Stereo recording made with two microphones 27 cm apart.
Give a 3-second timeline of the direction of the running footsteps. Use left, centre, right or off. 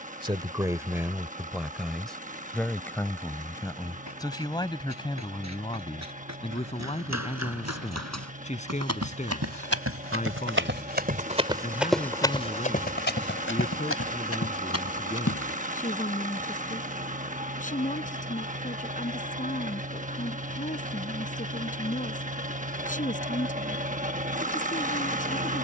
off, right, right, right, left, left, off, off, off.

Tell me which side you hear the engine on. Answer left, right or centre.
right.